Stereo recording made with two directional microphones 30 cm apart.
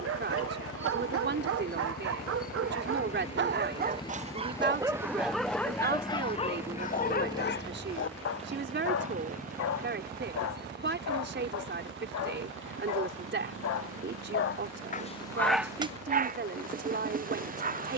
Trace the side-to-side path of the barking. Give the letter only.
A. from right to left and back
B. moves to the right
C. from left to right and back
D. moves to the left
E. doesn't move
A.